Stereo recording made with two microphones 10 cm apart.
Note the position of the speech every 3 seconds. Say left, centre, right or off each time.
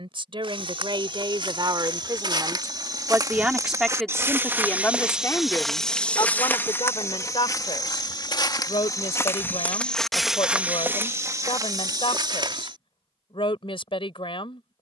right, centre, left, left, left.